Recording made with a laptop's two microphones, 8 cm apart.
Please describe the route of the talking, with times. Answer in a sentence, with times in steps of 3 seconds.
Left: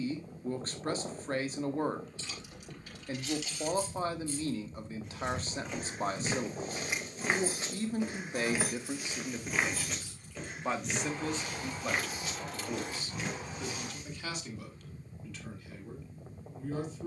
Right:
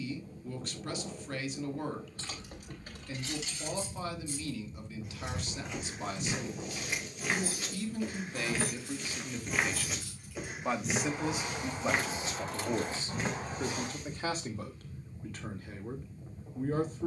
You can hear the talking on the left from 0 s, in the centre from 9 s and on the right from 12 s.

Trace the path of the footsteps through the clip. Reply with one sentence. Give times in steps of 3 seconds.
You can hear the footsteps not at all from 0 s, on the left from 3 s, in the centre from 9 s, on the right from 12 s and not at all from 15 s.